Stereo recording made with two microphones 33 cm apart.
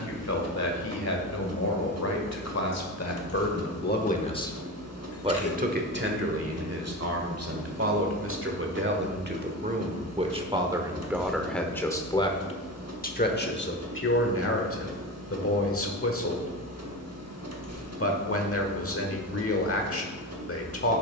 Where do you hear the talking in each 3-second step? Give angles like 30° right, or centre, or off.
50° left, 10° left, 50° right, 10° right, 30° left, 50° left, 50° left.